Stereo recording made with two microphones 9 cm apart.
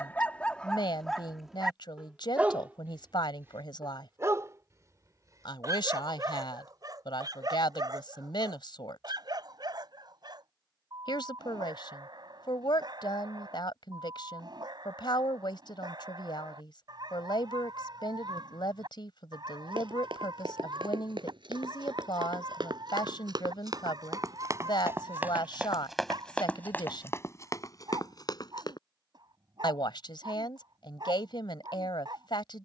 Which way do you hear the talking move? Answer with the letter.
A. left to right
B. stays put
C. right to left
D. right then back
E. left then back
B.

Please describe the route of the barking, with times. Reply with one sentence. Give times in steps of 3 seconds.
In this clip you hear the barking in the centre from 0 s and on the right from 3 s.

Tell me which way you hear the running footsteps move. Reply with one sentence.
You can hear the running footsteps travel towards the left.